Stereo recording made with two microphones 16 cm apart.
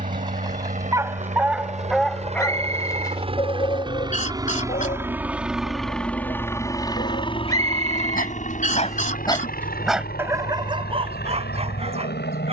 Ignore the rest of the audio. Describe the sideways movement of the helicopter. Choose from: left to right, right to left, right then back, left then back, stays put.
right to left.